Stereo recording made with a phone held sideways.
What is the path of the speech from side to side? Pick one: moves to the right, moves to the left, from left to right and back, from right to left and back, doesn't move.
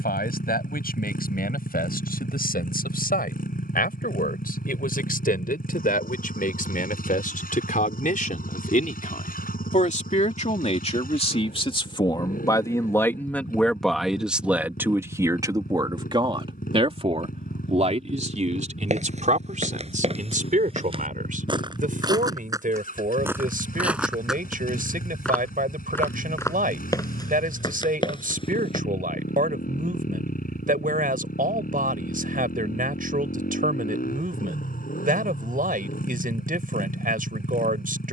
moves to the right.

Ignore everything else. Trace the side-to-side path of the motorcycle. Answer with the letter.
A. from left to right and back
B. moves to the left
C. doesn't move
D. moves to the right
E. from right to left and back
C.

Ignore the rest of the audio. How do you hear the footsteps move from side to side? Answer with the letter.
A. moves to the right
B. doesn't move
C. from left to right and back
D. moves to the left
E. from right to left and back
D.